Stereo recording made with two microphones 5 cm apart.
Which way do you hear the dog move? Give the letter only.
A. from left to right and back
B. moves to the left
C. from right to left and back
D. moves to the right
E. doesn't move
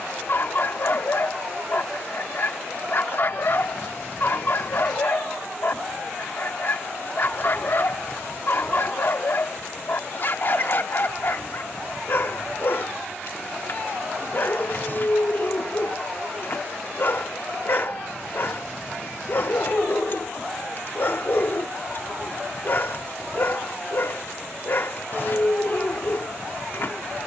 E.